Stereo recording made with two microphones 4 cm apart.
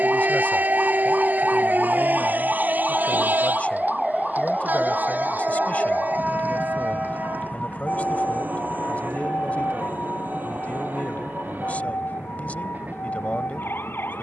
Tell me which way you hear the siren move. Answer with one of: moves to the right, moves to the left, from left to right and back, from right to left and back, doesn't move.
moves to the left.